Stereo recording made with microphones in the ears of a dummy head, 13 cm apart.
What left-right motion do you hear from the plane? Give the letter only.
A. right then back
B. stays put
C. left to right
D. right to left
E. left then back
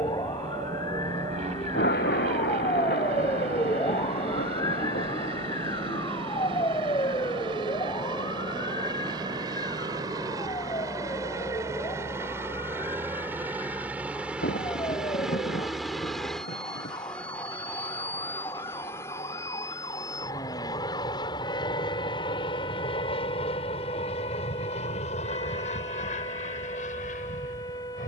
D.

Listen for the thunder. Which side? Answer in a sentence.
You can hear the thunder on the left.